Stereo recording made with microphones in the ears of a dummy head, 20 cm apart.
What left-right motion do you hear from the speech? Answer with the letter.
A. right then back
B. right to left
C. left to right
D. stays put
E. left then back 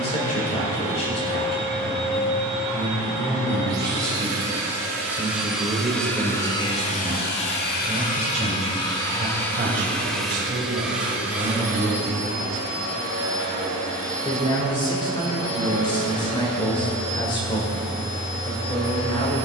A.